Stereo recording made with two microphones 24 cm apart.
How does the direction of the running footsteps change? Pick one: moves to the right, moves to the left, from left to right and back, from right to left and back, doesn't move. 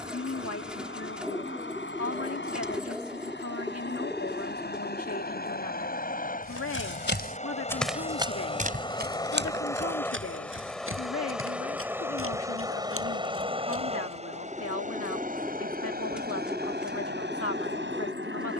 moves to the right.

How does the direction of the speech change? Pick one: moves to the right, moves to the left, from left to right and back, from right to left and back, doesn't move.
doesn't move.